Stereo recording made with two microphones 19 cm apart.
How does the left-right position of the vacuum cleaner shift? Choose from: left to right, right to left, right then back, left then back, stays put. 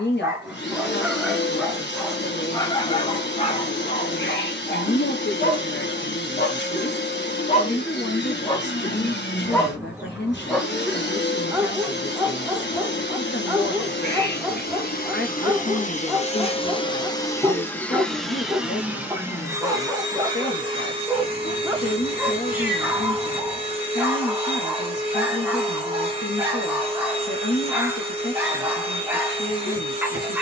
left to right.